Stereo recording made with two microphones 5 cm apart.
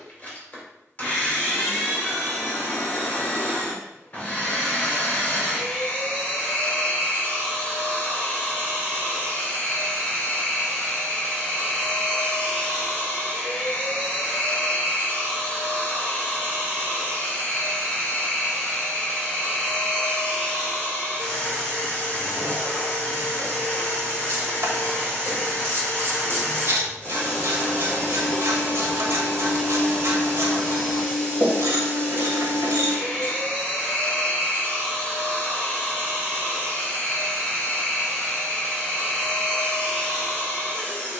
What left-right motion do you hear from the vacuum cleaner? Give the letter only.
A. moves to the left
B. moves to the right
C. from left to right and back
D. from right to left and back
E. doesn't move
E.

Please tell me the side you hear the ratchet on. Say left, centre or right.
right.